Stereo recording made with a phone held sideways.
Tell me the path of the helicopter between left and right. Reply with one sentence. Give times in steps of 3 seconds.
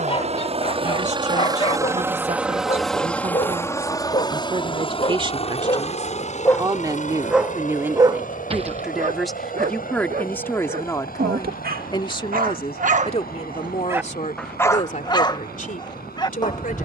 In this clip you hear the helicopter on the right from 0 s and on the left from 3 s.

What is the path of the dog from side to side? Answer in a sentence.
You can hear the dog go right and come back.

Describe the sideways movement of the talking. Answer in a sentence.
You can hear the talking move from right to left.